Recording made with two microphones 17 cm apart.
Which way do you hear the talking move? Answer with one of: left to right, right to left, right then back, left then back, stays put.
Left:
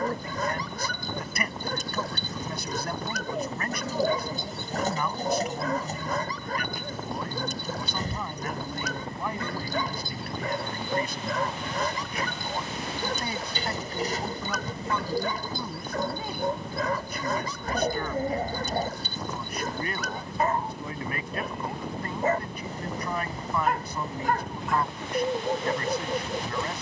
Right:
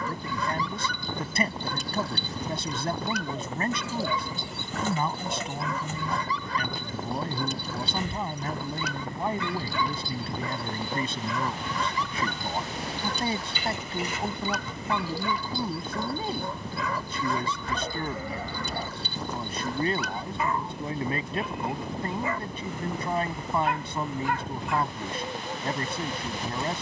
stays put.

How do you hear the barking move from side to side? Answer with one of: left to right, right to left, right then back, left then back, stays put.
stays put.